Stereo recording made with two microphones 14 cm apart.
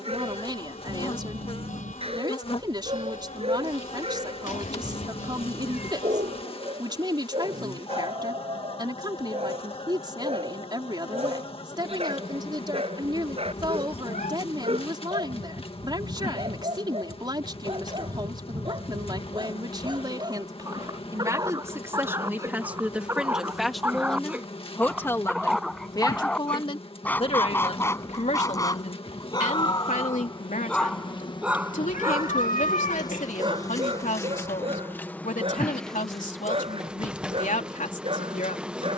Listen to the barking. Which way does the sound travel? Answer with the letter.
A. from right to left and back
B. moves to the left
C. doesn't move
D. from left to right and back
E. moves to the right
A.